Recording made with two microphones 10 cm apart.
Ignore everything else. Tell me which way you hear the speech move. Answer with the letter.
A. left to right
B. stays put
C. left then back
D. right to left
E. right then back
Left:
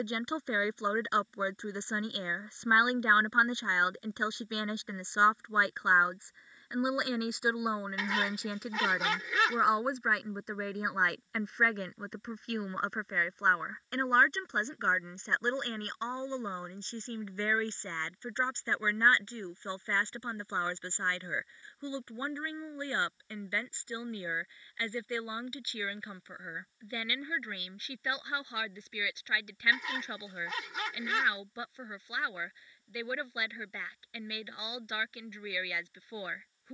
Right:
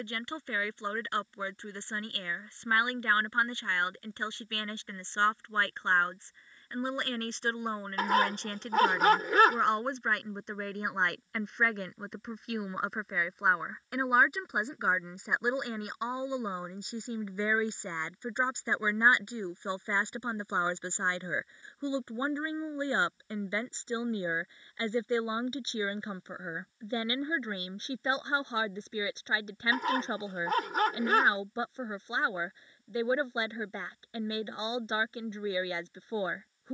A.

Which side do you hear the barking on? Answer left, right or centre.
right.